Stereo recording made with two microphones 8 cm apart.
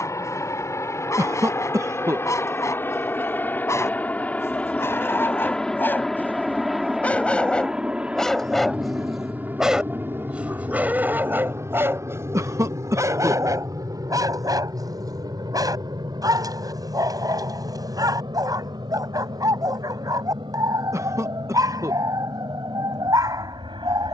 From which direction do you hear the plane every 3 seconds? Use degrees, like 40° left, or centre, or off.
40° left, 20° left, 10° right, 30° right, 40° right, 50° right, 60° right, 70° right.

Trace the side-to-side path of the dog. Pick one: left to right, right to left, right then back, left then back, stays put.
left to right.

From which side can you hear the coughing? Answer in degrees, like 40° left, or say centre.
40° right.